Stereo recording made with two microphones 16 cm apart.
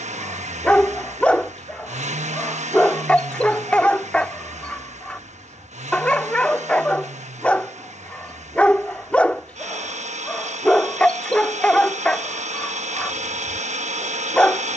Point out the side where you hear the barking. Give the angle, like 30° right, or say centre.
10° left.